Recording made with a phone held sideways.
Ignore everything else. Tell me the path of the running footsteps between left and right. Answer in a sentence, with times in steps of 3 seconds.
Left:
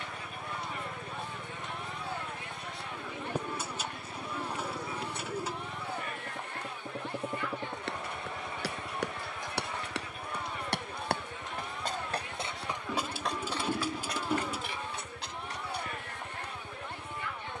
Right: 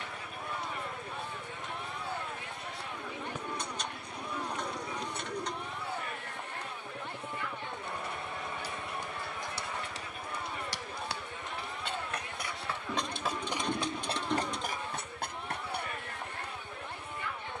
You can hear the running footsteps not at all from 0 s, on the left from 6 s, in the centre from 12 s and on the right from 15 s.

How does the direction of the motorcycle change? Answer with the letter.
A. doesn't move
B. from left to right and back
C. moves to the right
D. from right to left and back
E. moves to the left
A.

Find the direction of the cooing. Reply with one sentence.
You can hear the cooing in the centre.